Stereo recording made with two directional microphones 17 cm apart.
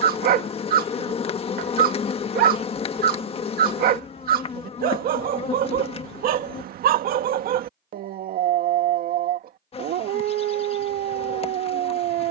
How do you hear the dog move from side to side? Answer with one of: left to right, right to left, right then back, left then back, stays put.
stays put.